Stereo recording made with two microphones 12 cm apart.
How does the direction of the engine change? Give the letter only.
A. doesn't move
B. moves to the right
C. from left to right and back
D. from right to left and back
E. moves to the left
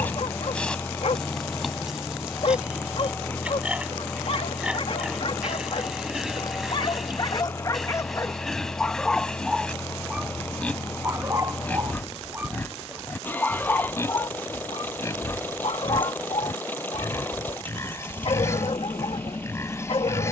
A.